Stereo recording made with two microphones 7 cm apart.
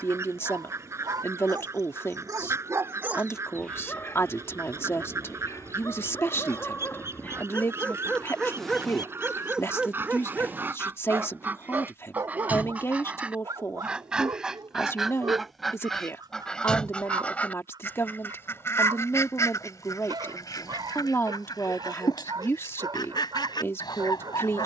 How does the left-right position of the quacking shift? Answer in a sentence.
You can hear the quacking go from the right side to the left.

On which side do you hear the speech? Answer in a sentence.
You can hear the speech on the left.